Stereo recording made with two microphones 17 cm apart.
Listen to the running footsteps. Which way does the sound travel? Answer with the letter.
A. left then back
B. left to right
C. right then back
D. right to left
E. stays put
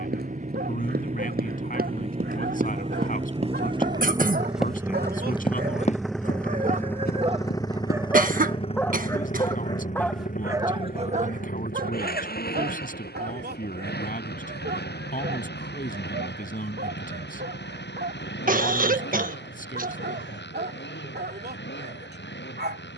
D.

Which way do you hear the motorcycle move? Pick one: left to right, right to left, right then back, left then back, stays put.
right to left.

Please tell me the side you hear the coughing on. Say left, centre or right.
right.